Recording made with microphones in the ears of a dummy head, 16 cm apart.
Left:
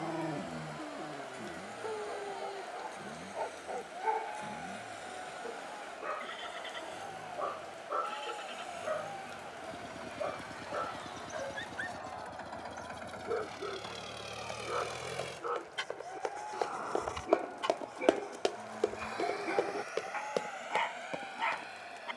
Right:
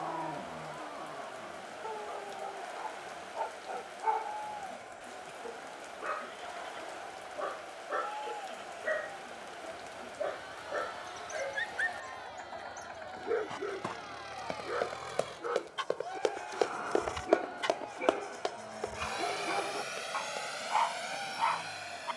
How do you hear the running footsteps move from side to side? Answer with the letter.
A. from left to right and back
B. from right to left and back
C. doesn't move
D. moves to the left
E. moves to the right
D.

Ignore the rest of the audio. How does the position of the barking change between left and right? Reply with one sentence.
In this clip you hear the barking go right and come back.